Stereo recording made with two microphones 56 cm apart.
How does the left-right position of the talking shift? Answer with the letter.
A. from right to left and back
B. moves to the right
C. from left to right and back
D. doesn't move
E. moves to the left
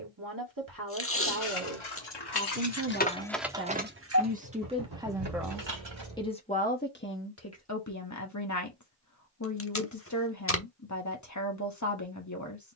E.